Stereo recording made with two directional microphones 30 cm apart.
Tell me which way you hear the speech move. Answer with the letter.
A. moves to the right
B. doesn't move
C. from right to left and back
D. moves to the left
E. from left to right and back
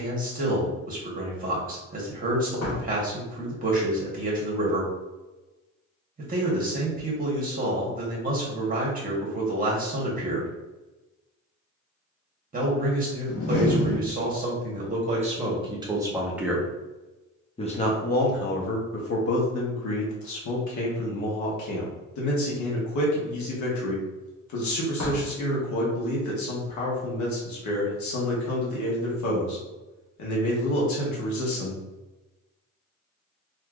D.